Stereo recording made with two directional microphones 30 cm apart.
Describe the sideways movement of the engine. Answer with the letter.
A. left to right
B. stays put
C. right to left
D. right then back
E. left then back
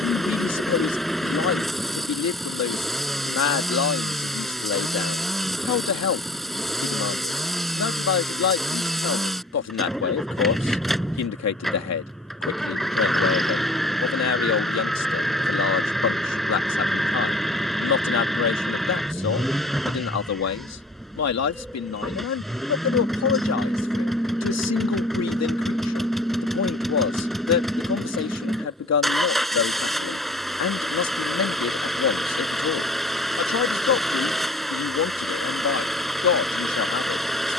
B.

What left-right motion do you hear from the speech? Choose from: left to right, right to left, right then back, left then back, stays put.
stays put.